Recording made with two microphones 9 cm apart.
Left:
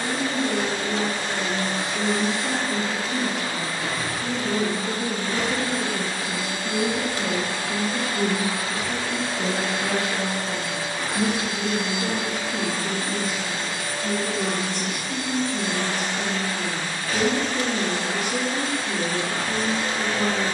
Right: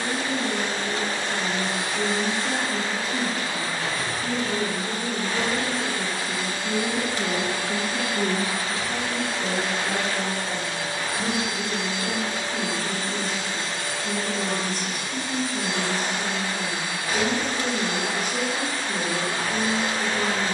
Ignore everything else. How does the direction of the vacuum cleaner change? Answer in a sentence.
You can hear the vacuum cleaner move from left to right.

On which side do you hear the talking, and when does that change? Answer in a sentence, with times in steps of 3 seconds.
You can hear the talking on the left from 0 s, in the centre from 6 s and on the left from 9 s.